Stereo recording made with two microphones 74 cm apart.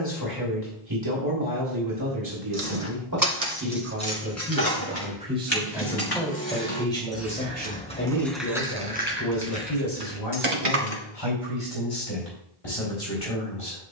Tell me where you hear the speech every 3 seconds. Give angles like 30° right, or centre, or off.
30° right, 10° right, 10° left, 40° left, 50° left.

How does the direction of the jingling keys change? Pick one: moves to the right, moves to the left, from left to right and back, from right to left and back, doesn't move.
from right to left and back.